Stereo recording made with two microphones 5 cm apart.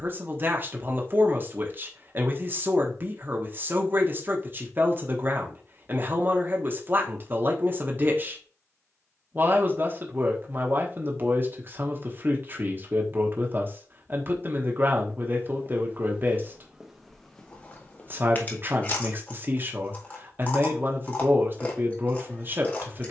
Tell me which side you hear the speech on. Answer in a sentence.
You can hear the speech on the right.